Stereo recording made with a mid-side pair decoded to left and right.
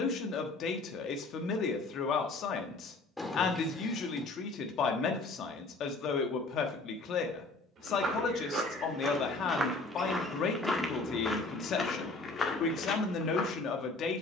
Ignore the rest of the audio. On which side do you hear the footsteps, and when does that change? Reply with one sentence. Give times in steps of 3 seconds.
In this clip you hear the footsteps not at all from 0 s, on the right from 6 s, in the centre from 9 s and on the left from 12 s.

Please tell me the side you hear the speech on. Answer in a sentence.
You can hear the speech on the left.